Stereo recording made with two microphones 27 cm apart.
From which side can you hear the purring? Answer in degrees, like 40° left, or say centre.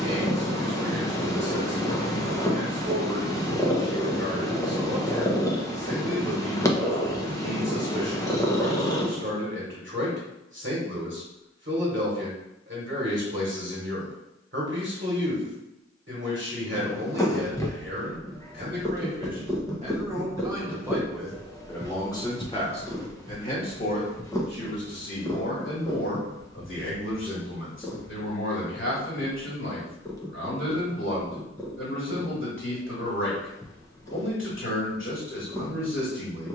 10° left.